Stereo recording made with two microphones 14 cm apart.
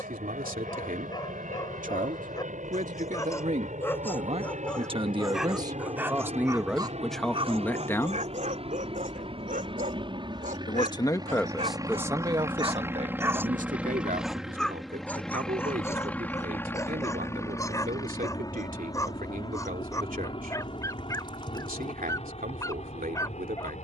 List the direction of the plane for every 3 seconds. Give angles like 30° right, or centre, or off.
70° right, 60° right, 50° right, 30° right, 10° right, 10° left, 30° left, 40° left.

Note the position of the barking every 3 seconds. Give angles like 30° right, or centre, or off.
30° left, 10° left, 40° right, 60° right, 10° right, 20° left, 20° left, 20° left.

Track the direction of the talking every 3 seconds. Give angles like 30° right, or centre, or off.
70° right, 40° right, centre, 10° left, 50° right, 70° right, 70° right, 70° right.